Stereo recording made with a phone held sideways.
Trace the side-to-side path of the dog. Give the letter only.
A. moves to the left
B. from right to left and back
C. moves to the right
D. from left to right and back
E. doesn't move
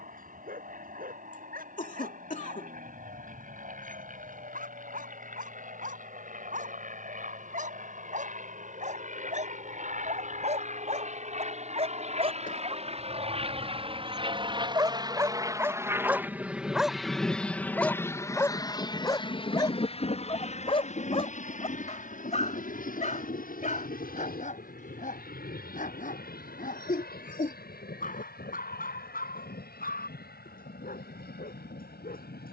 A.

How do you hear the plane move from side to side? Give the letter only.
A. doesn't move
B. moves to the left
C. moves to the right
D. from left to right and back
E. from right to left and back
B.